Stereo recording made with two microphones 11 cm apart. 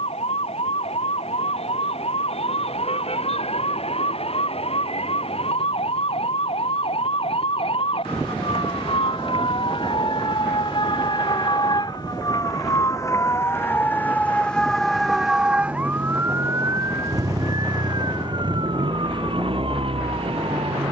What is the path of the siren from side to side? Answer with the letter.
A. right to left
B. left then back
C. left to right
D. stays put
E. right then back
C.